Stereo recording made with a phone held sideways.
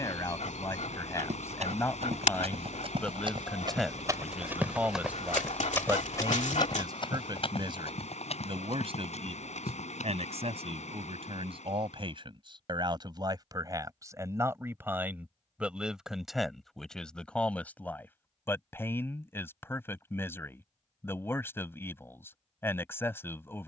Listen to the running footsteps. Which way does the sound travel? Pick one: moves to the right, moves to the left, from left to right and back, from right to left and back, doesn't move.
moves to the left.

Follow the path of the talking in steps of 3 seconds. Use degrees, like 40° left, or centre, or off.
20° left, 10° right, 40° right, 50° right, 30° right, centre, 20° left, 20° left.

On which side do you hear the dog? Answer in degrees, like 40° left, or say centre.
60° left.